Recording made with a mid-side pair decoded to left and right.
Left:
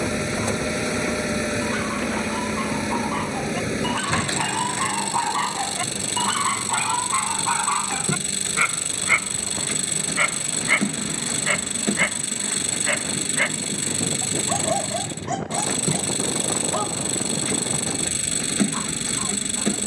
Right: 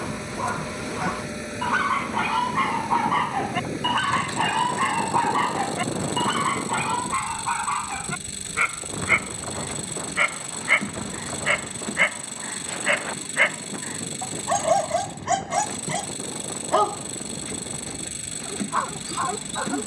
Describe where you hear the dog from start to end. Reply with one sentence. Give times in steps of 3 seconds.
In this clip you hear the dog on the right from 0 s, in the centre from 6 s and on the right from 12 s.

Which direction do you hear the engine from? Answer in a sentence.
In this clip you hear the engine on the left.